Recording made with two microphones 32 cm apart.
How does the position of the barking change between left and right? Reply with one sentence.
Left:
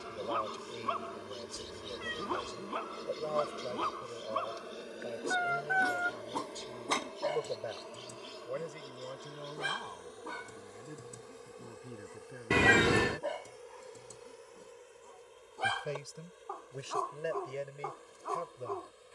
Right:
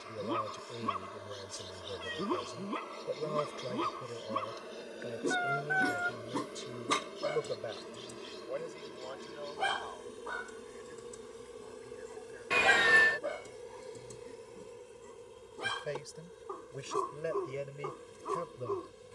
You can hear the barking go left and come back.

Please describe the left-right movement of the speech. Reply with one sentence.
In this clip you hear the speech move from right to left and back again.